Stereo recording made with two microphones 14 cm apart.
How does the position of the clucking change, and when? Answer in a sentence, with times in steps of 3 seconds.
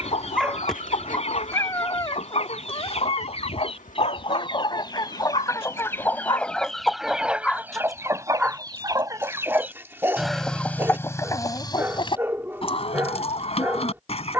You can hear the clucking on the left from 0 s, in the centre from 6 s and on the left from 12 s.